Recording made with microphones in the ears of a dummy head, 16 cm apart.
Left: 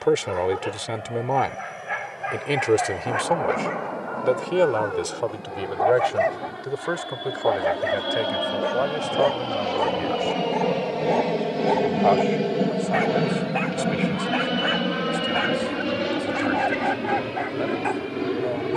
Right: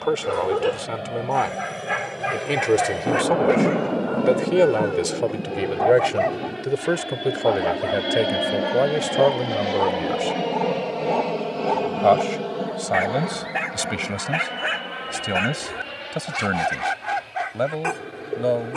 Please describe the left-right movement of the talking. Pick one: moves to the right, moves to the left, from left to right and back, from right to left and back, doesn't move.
moves to the right.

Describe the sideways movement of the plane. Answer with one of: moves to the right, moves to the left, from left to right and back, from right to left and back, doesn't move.
moves to the left.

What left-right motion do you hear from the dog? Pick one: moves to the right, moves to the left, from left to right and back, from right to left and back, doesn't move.
from right to left and back.